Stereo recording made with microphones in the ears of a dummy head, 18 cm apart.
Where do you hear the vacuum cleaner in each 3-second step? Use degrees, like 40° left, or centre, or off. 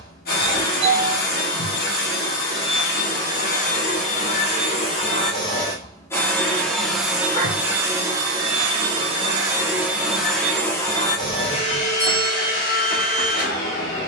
50° left, 30° left, 10° right, 10° left, 50° left.